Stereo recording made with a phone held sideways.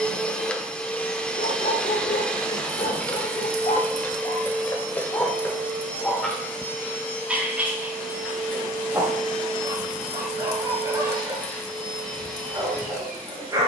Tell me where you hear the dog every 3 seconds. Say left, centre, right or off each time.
left, left, centre, right, right.